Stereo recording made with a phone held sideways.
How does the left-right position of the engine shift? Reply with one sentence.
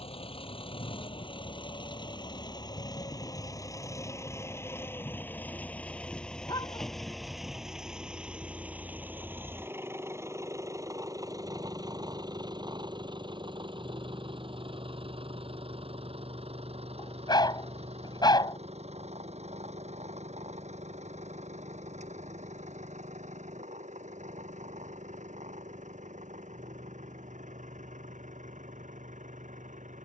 You can hear the engine travel towards the right.